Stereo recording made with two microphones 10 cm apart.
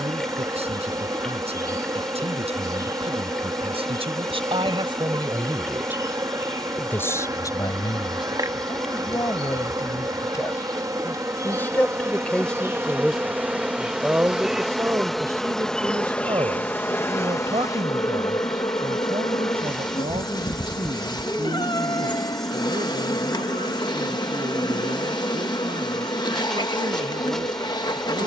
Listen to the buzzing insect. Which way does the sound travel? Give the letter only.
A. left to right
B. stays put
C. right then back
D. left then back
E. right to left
E.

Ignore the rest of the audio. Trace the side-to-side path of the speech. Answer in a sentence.
You can hear the speech move from right to left and back again.